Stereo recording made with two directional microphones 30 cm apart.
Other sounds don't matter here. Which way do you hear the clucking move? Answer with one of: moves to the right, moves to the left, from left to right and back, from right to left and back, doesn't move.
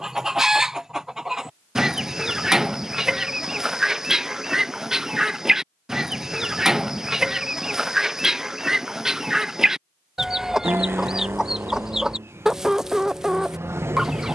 doesn't move.